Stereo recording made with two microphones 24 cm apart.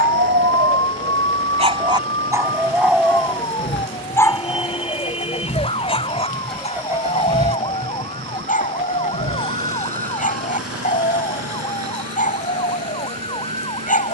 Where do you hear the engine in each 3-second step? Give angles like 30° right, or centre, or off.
60° left, 40° left, 20° right, 70° right, 80° right.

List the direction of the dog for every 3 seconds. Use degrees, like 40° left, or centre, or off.
30° right, 10° left, 30° left, 30° left, 30° left.